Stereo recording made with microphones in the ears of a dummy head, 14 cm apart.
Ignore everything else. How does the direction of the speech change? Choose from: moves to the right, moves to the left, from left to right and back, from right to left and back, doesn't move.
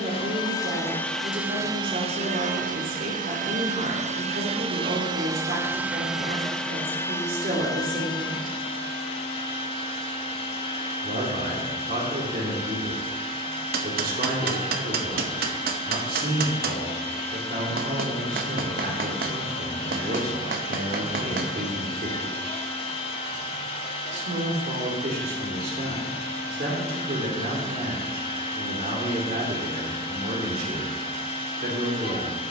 doesn't move.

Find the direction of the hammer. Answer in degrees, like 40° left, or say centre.
70° right.